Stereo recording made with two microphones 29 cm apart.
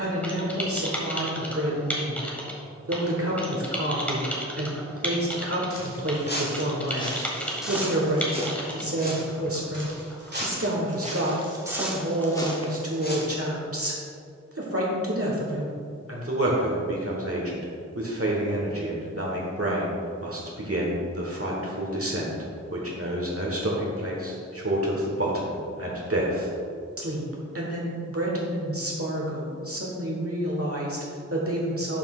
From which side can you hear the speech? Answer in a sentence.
You can hear the speech on the right.